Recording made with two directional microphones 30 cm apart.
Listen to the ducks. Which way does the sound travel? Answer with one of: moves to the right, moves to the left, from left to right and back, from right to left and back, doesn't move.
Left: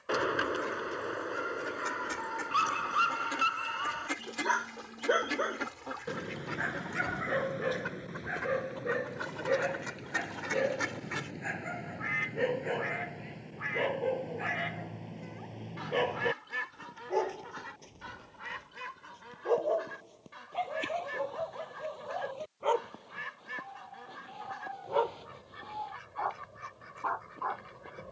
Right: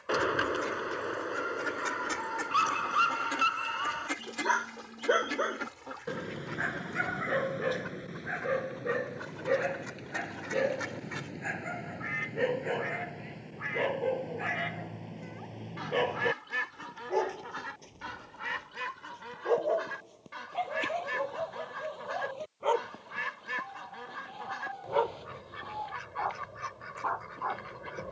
from right to left and back.